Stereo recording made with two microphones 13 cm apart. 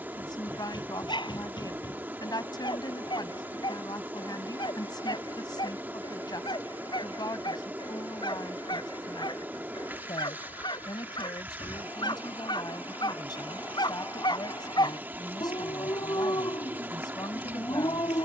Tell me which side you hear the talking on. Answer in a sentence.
In this clip you hear the talking on the left.